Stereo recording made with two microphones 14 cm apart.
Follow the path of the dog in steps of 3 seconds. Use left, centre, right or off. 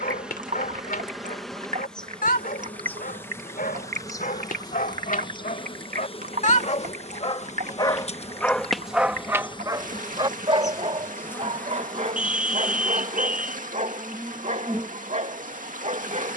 left, left, left, right, right, right.